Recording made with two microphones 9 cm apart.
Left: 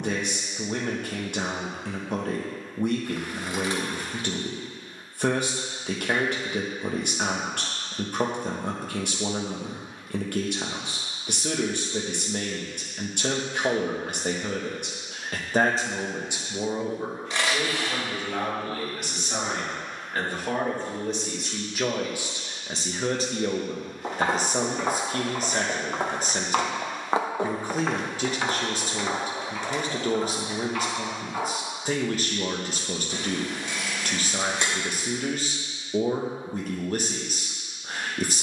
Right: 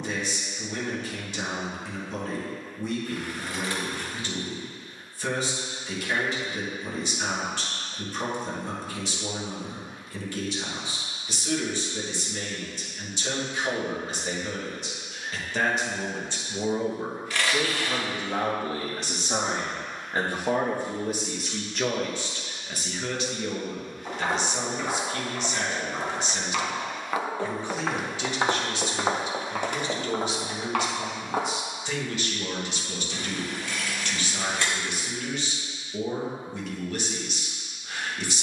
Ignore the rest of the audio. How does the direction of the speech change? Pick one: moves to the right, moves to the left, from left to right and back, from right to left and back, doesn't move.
from left to right and back.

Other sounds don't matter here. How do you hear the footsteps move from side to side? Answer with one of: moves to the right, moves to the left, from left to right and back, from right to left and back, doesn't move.
moves to the right.